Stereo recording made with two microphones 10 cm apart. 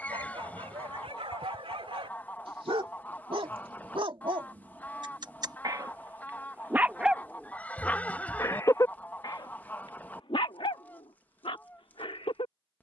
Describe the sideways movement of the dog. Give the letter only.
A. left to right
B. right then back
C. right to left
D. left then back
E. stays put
C.